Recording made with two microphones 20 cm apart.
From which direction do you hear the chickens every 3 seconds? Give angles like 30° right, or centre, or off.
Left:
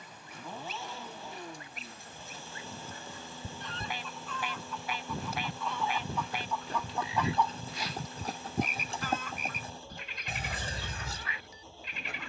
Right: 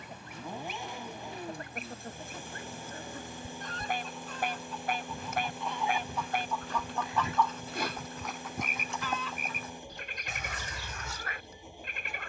60° right, 40° right, 10° left, 60° left.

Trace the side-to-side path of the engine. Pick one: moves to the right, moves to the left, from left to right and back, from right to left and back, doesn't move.
doesn't move.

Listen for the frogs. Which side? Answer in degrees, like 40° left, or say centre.
50° right.